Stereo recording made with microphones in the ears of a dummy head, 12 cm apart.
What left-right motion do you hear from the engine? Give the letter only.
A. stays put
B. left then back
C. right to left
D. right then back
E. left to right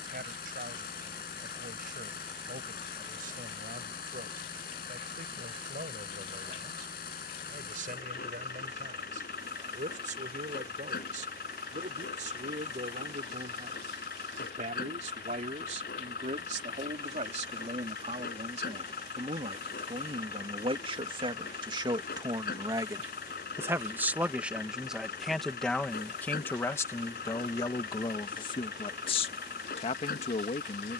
A.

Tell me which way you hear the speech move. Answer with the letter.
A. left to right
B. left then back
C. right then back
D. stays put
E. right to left
E.